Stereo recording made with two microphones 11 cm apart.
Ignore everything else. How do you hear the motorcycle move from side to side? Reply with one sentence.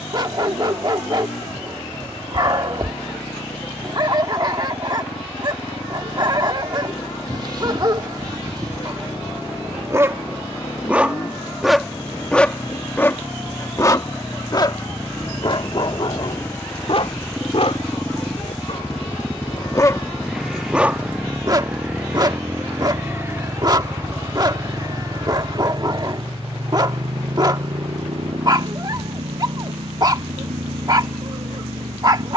In this clip you hear the motorcycle travel towards the right.